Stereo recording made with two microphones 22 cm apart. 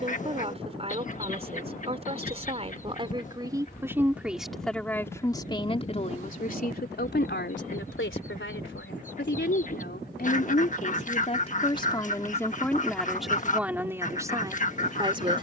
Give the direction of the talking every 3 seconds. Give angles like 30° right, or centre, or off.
30° right, centre, 50° left, 40° left, centre.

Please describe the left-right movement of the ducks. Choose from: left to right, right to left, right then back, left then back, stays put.
stays put.